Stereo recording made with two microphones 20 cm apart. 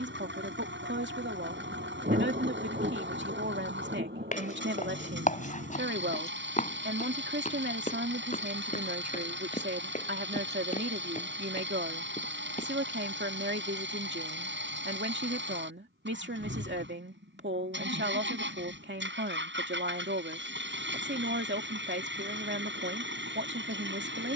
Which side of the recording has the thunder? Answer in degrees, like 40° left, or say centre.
40° right.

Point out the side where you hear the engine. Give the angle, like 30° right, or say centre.
60° right.